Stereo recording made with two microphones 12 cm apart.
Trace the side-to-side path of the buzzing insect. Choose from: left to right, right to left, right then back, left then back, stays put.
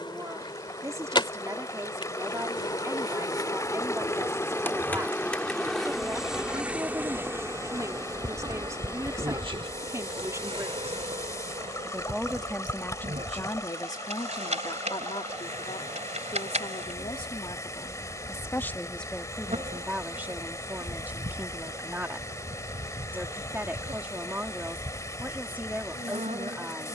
left to right.